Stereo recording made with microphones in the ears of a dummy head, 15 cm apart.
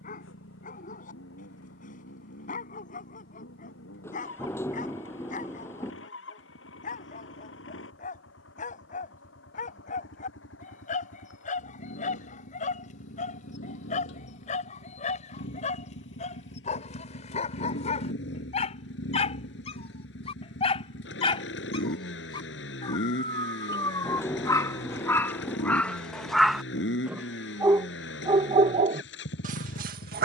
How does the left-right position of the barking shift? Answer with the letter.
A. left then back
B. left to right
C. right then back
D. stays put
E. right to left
B.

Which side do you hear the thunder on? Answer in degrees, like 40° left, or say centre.
20° left.